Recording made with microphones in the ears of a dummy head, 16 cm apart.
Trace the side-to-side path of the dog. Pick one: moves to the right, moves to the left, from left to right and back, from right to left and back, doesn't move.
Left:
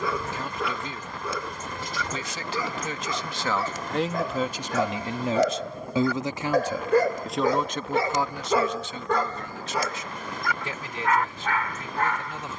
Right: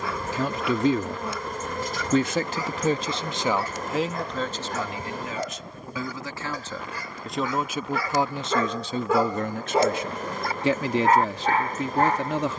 moves to the right.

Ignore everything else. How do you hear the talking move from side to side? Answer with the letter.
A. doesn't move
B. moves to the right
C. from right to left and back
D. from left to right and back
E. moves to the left
C.